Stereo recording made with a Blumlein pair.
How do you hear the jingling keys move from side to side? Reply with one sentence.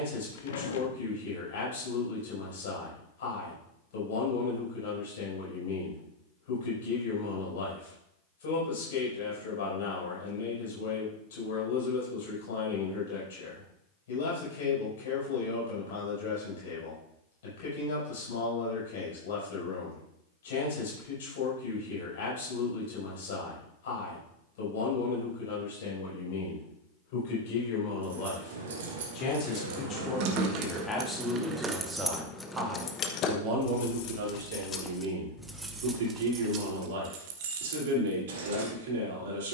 In this clip you hear the jingling keys go left and come back.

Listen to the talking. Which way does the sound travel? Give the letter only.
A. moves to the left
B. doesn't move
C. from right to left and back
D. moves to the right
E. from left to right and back
D.